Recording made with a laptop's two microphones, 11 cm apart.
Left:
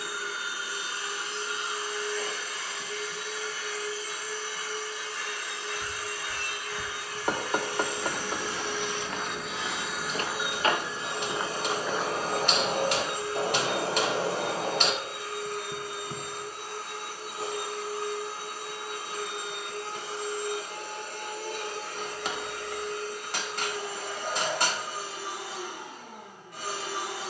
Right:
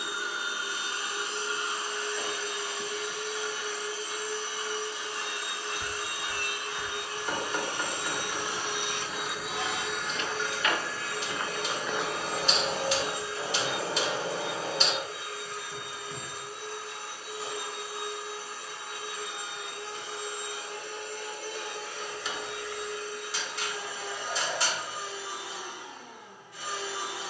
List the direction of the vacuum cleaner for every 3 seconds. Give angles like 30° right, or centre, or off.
20° right, 20° right, 20° right, 10° left, 60° left, 80° left, 80° left, 80° left, 80° left.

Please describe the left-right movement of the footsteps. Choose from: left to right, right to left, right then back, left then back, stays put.
left then back.